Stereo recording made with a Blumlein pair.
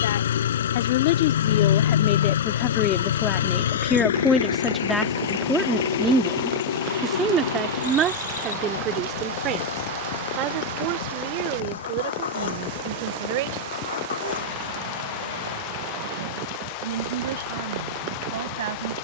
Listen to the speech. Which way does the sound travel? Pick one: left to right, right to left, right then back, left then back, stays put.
left to right.